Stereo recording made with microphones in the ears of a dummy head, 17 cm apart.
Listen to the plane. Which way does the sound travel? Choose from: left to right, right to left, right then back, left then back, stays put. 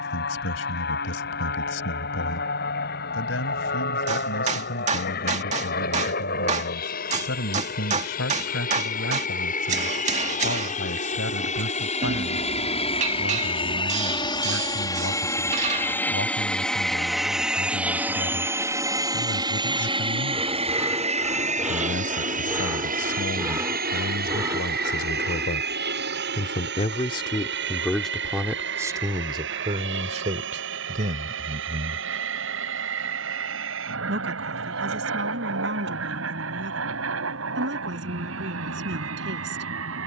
left to right.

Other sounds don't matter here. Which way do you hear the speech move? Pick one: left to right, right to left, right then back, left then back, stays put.
left to right.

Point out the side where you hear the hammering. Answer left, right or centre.
right.